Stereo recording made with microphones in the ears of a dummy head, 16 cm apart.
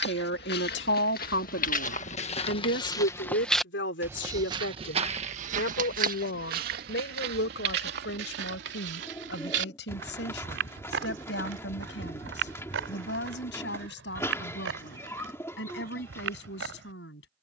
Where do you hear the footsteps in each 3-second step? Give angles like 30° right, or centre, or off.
50° left, 20° right, 60° right, 70° right, 80° right, 80° right.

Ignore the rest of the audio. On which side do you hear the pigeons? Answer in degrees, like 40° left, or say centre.
10° left.